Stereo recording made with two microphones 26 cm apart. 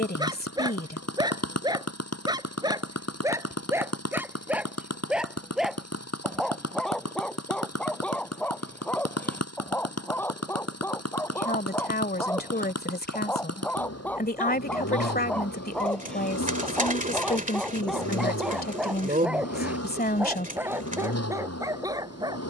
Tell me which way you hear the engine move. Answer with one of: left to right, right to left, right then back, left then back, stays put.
stays put.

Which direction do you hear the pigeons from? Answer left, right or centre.
right.